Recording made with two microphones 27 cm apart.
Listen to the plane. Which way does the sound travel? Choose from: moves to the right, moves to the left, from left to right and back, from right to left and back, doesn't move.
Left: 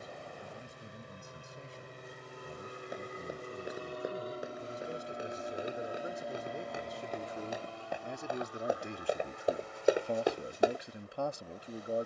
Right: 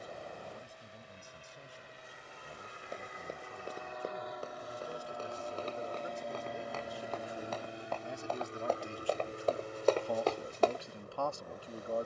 moves to the right.